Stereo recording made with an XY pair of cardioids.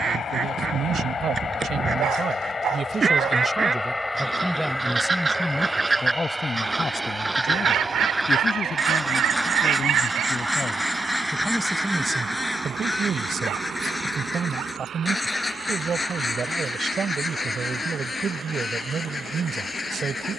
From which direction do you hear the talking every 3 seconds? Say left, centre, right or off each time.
right, centre, left, left, right, right, right.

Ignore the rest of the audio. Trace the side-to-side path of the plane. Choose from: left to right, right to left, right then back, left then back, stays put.
left to right.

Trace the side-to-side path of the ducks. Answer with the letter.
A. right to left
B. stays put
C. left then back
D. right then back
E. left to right
A.